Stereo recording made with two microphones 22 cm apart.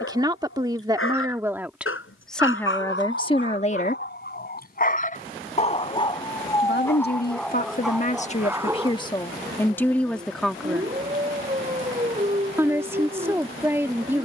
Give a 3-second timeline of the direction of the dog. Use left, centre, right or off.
left, left, centre, right, right.